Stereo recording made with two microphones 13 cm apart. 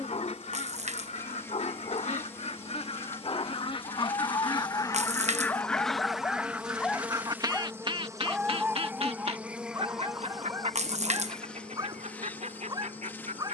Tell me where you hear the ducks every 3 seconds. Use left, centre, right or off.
left, left, right, right, right.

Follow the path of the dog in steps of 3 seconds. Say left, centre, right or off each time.
left, left, centre, right, right.